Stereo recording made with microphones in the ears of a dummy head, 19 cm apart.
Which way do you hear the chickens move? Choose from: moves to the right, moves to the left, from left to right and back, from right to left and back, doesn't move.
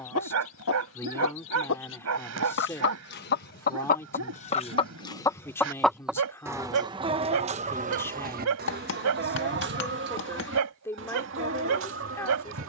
moves to the right.